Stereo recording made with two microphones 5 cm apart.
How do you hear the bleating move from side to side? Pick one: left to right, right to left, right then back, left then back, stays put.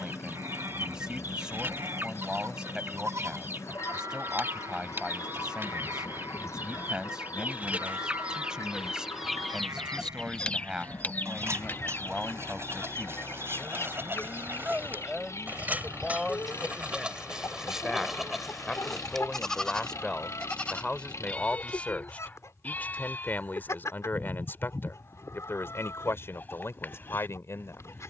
right to left.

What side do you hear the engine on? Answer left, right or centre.
left.